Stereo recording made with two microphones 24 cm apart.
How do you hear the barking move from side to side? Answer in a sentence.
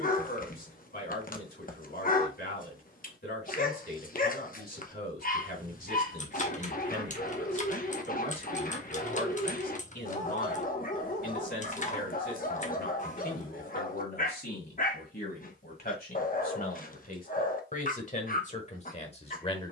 You can hear the barking stay put.